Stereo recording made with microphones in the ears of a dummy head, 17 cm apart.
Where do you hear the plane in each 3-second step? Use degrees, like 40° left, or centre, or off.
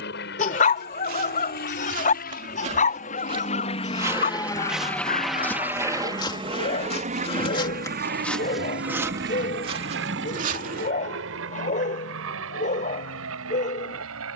60° left, 20° left, 40° right, 60° right, 70° right.